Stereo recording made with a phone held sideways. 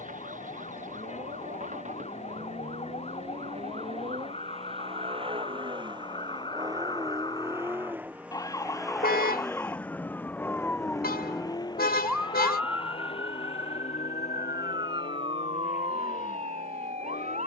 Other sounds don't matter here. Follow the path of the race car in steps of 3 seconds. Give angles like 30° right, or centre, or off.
60° right, 40° right, 20° right, 10° left, 40° left, 50° left.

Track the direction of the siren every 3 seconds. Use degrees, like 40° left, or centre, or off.
50° left, 40° left, 30° left, 10° left, 20° right, 40° right.